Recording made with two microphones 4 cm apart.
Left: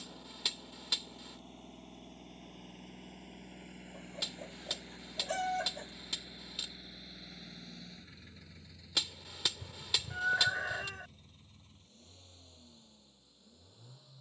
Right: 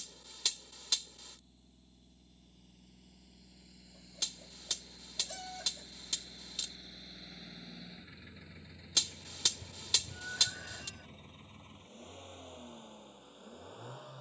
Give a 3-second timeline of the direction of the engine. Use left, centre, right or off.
left, left, centre, right, right.